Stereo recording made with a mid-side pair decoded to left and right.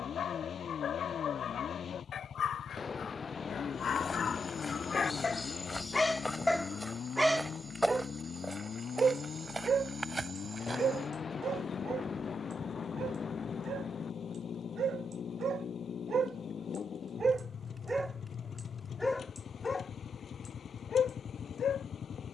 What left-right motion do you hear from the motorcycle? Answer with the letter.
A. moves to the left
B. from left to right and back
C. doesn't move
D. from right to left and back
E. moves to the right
C.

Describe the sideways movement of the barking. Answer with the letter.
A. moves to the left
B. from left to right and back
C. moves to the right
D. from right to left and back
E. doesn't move
B.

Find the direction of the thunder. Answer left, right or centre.
left.